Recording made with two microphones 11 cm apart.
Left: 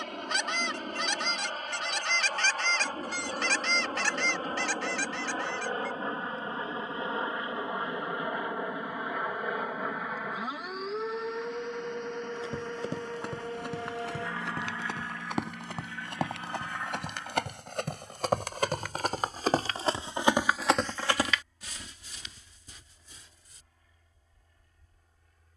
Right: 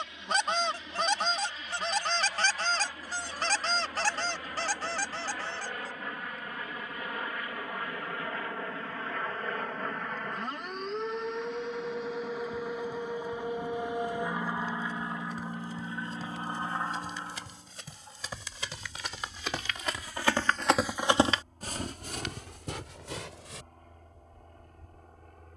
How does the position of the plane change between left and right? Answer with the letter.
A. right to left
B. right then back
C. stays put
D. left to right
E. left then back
D.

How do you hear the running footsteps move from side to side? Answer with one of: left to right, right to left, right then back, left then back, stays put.
left to right.